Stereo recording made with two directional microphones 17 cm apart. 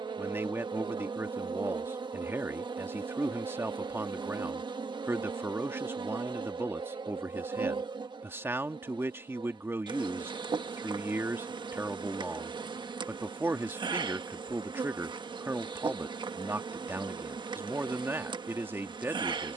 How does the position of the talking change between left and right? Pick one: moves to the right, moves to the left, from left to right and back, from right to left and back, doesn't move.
doesn't move.